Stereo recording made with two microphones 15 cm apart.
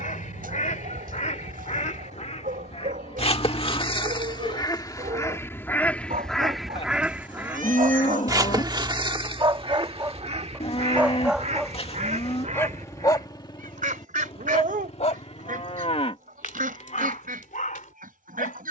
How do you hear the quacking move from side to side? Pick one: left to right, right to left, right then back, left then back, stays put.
left to right.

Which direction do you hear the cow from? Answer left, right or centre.
left.